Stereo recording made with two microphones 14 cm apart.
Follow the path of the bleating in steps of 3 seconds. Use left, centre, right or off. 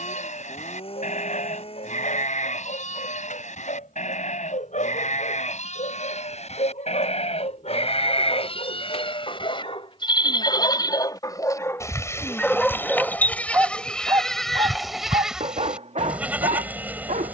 left, left, left, left, centre, centre.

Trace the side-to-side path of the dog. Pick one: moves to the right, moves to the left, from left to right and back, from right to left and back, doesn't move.
moves to the right.